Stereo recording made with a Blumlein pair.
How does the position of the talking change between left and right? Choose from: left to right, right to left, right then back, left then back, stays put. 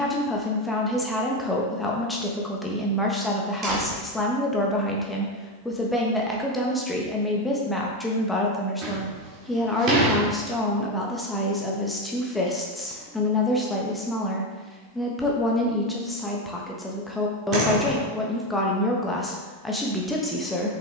stays put.